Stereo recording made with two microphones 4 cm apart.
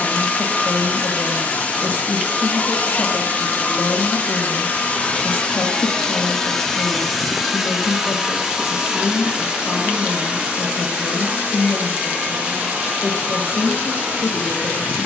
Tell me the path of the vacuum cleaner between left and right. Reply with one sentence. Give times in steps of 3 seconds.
You can hear the vacuum cleaner on the left from 0 s, in the centre from 6 s and on the right from 9 s.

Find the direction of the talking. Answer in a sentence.
In this clip you hear the talking on the left.